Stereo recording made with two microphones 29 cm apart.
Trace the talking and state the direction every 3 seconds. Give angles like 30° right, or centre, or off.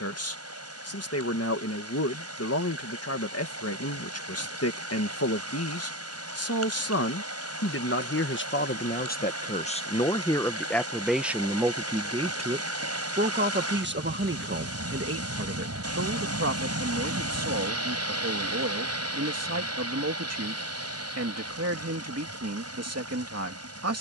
50° left, 50° left, 50° left, 10° left, 30° right, 50° right, 60° right, 60° right.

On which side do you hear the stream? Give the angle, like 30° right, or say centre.
60° right.